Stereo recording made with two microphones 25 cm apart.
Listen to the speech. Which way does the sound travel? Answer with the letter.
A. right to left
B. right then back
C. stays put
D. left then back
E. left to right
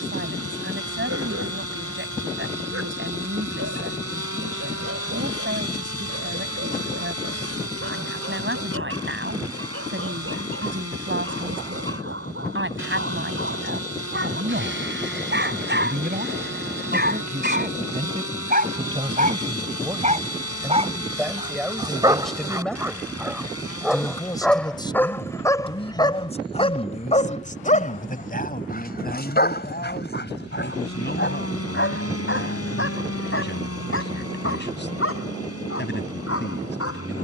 A.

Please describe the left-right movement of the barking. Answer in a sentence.
In this clip you hear the barking move to the left.